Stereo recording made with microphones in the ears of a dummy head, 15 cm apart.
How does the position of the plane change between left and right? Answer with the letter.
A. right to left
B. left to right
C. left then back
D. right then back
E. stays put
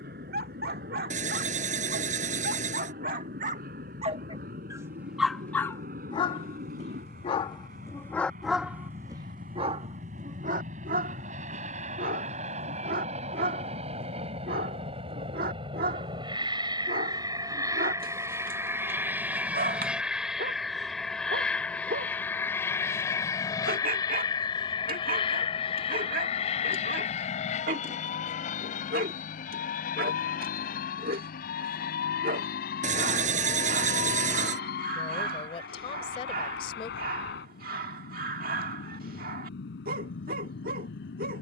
A.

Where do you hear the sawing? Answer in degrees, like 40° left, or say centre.
50° right.